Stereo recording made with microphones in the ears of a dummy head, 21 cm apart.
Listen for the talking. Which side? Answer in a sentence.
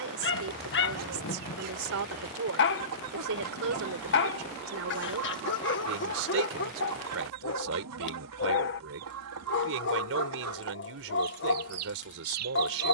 In this clip you hear the talking on the right.